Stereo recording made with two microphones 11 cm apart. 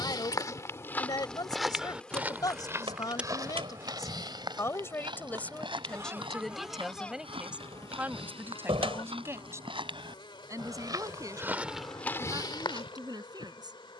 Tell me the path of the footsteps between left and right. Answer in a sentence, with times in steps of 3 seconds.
In this clip you hear the footsteps in the centre from 0 s, on the right from 3 s and on the left from 12 s.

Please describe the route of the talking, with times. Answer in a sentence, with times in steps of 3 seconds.
You can hear the talking on the left from 0 s, in the centre from 6 s and on the right from 9 s.